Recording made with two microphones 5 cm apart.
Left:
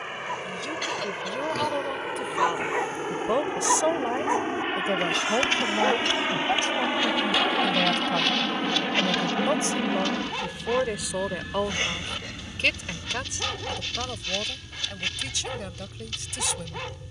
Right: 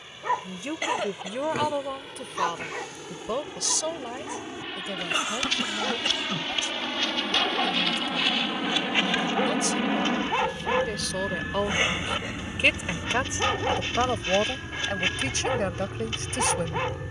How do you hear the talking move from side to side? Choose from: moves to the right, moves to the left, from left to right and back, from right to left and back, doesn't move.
from right to left and back.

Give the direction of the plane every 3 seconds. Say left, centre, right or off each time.
left, left, left, centre, right, right.